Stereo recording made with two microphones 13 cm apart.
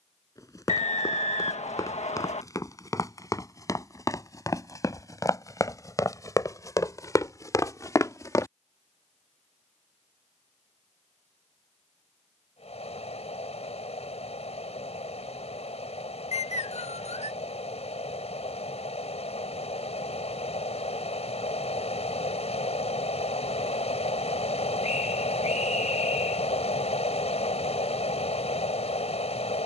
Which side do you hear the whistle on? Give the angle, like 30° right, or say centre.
60° left.